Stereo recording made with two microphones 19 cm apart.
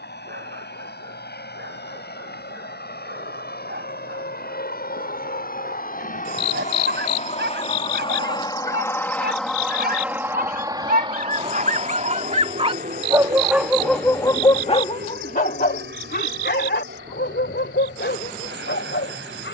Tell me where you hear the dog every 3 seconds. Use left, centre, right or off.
right, right, right, right, centre, left, left.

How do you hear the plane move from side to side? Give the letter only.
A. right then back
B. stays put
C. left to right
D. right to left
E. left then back
C.